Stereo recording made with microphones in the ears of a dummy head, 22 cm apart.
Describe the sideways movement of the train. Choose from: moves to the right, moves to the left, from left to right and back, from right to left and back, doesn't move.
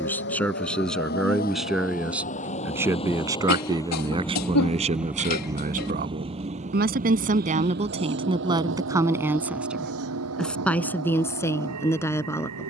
moves to the right.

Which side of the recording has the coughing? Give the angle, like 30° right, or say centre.
80° left.